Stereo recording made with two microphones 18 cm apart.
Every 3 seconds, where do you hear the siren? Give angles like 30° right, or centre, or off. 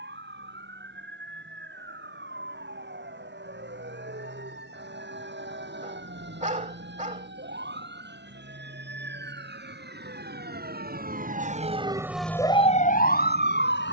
80° right, 80° right, 80° right, 60° right, 40° left.